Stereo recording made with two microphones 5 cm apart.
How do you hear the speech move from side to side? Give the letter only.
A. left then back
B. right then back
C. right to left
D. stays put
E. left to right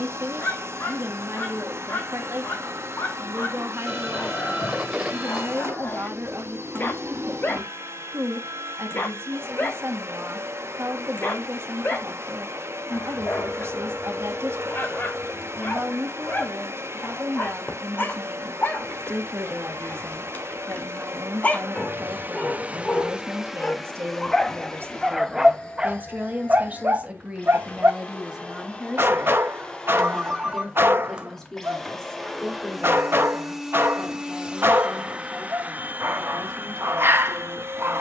C.